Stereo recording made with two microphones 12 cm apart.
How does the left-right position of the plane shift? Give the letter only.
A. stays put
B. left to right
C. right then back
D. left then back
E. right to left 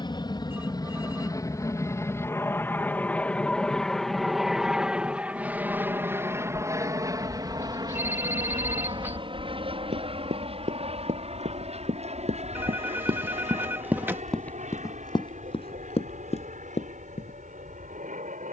B.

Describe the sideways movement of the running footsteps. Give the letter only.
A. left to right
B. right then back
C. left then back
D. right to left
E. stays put
D.